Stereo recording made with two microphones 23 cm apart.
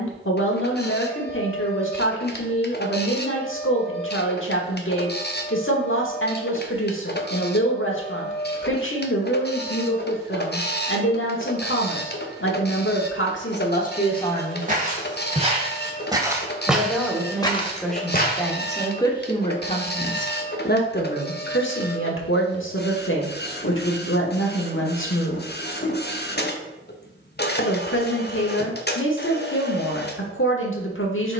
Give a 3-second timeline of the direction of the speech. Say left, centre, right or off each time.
left, left, left, left, left, centre, left, left, left, left, left.